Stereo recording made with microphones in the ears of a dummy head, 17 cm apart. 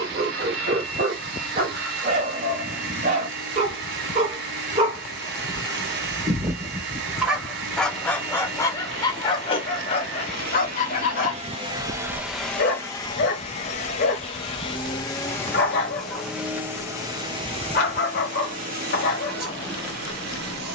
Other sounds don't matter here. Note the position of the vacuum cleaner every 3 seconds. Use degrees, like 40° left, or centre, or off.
60° right, 60° right, 60° right, 50° right, 20° left, 10° right, 50° right.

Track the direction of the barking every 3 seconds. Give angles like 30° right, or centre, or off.
40° right, 30° right, centre, 40° left, 50° left, 50° left, 50° left.